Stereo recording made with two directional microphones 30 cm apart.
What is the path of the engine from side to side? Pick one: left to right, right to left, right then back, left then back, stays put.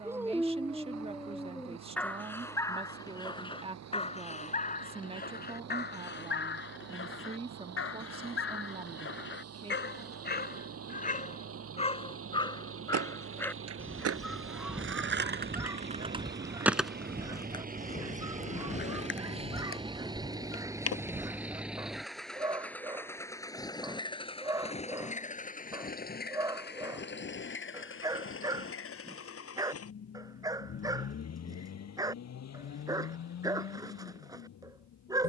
right to left.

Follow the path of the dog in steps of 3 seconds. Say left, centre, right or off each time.
centre, left, left, left, centre, centre, centre, centre, centre, centre, centre, centre.